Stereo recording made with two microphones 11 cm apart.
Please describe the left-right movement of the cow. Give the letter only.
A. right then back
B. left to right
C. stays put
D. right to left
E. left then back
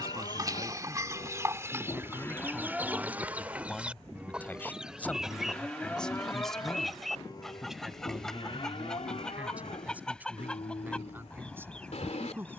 A.